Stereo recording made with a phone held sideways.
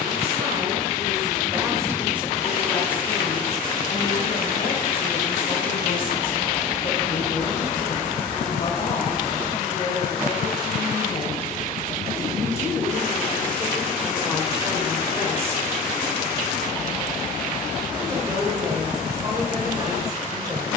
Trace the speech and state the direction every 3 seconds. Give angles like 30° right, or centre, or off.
20° right, 40° left, 60° left, 40° left, centre, 20° right, 30° right.